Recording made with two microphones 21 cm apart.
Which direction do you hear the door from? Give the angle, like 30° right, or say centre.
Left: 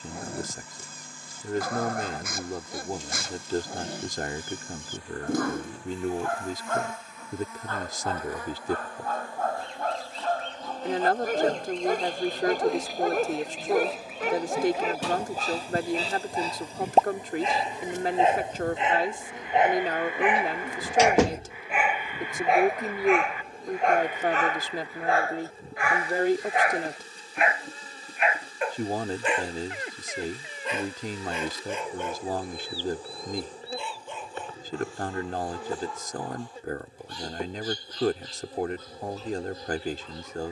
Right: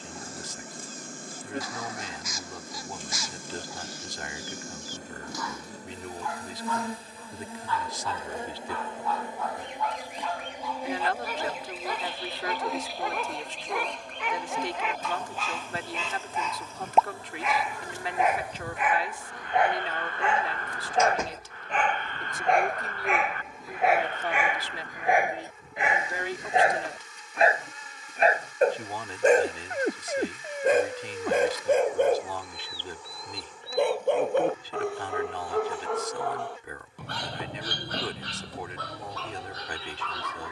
80° left.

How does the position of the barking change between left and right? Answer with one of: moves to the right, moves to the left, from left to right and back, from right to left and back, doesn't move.
moves to the right.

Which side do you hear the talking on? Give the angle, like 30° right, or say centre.
50° left.